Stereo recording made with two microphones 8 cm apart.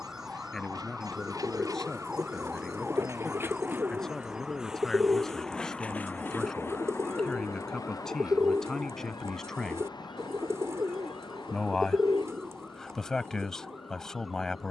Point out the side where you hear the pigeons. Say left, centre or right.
right.